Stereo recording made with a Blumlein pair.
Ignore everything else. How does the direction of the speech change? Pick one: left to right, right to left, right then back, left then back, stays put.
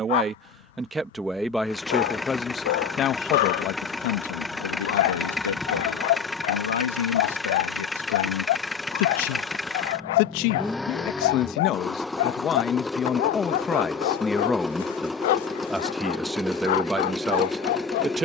left then back.